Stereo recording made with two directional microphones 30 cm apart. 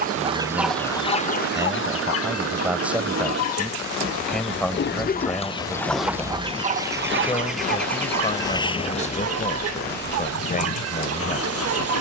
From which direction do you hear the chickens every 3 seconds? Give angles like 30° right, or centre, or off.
20° left, 30° left, 40° right, 50° right.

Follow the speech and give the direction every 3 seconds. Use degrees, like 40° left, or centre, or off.
10° right, centre, 20° left, 30° left.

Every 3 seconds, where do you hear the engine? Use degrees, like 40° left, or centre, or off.
50° right, 30° right, centre, 40° left.